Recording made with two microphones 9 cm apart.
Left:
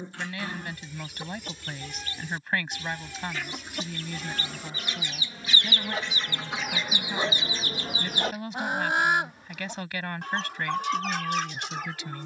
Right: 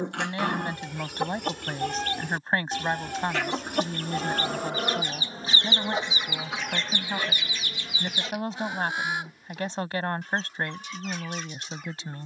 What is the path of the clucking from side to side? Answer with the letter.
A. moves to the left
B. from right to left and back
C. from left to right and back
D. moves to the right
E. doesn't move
A.